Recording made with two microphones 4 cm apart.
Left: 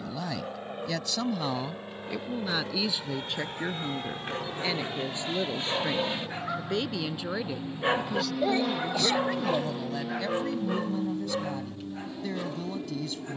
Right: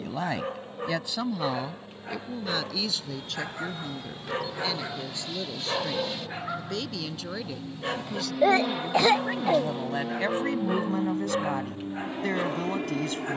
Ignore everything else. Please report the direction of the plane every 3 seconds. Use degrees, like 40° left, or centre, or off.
60° left, 40° left, 10° left, 30° right, 50° right.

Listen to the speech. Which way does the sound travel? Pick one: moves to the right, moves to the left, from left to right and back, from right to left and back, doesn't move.
from right to left and back.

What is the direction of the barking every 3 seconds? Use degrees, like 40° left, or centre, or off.
50° right, 30° right, 10° left, 10° right, 50° right.